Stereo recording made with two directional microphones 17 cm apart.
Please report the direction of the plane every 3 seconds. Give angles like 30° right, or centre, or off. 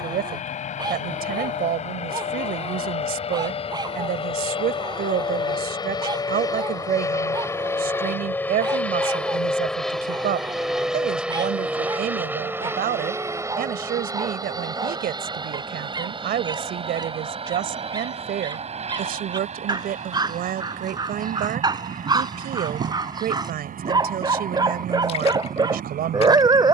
40° left, 30° left, 20° left, centre, 20° right, 30° right, 40° right, 50° right, 50° right.